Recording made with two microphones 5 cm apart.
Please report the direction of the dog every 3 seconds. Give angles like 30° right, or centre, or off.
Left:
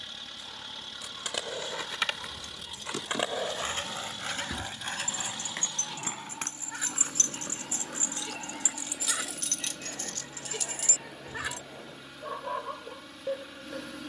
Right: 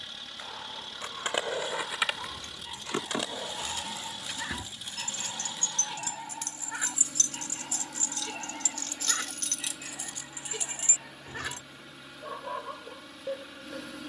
20° right, 20° right, 10° right, centre, 10° left.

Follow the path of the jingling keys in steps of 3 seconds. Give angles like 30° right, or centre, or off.
40° right, centre, 30° left, 10° right, off.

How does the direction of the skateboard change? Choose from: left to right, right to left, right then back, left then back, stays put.
right to left.